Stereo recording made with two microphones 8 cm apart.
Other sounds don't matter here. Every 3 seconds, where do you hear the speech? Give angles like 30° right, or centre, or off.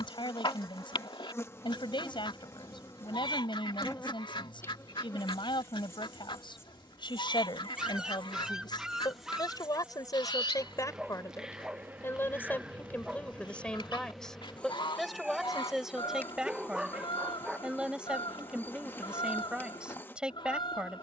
70° left, 70° left, 70° left, 50° left, 20° left, 10° right, 10° right.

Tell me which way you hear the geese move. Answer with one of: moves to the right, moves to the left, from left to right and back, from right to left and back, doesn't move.
doesn't move.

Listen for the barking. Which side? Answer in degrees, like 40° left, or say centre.
10° right.